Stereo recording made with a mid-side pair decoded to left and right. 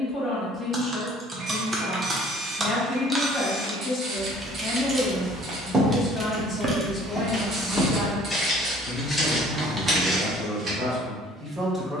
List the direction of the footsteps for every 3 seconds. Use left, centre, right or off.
off, right, centre, centre.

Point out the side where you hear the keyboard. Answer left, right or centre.
right.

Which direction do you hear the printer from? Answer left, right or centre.
right.